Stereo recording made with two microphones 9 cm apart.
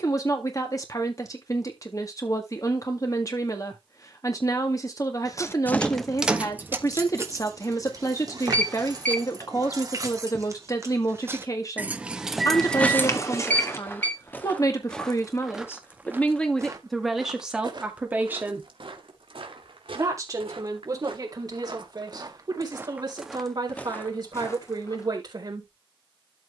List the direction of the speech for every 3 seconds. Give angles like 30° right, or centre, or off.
40° left, 40° left, 40° left, 40° left, 40° left, 10° left, 30° right, 50° right, 50° right.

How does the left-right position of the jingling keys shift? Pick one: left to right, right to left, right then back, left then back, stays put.
right then back.